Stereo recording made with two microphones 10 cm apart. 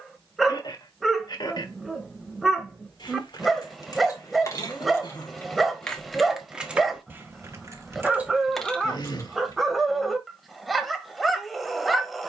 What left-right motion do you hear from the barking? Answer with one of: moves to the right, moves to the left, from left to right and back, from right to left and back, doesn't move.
doesn't move.